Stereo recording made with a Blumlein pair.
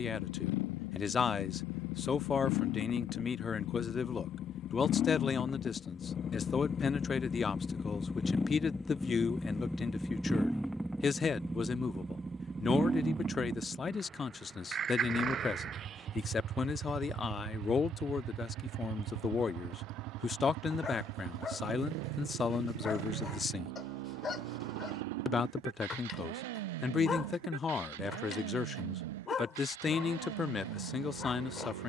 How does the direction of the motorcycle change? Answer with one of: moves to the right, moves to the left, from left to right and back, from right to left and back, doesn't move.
moves to the right.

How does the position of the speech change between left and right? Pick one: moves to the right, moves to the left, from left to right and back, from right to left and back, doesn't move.
doesn't move.